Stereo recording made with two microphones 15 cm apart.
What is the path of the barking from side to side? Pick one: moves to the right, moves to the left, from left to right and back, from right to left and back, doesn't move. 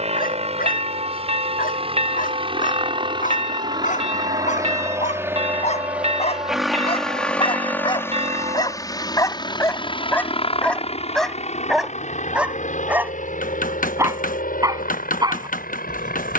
moves to the right.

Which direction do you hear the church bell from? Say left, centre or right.
right.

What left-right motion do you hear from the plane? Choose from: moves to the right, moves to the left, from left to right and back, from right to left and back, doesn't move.
moves to the left.